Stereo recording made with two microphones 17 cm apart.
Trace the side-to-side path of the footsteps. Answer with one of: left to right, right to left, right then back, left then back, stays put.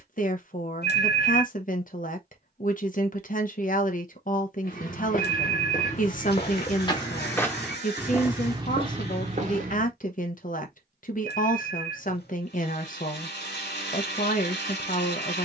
left to right.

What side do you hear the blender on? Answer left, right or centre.
left.